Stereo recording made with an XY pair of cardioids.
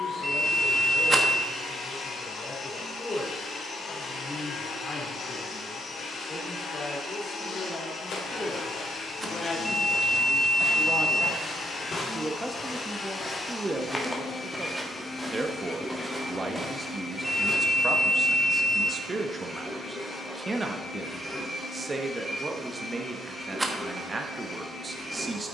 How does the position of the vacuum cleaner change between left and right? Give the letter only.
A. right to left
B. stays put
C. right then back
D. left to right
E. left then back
D.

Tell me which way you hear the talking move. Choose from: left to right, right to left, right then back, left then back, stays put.
left to right.